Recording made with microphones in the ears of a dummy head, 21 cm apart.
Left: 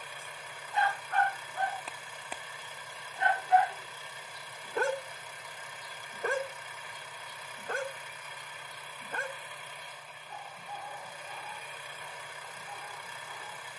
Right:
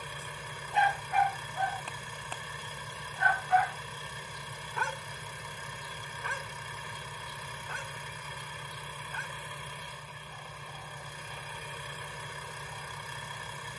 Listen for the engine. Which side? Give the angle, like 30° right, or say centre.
80° right.